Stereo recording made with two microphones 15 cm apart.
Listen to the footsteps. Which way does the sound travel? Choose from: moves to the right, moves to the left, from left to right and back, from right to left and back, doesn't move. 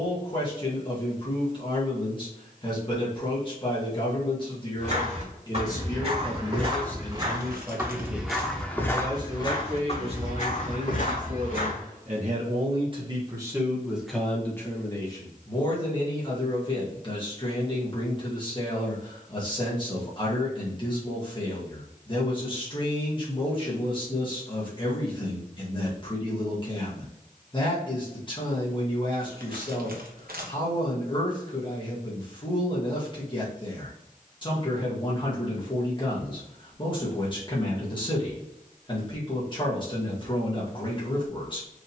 moves to the left.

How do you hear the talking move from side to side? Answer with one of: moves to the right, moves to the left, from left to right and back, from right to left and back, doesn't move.
from left to right and back.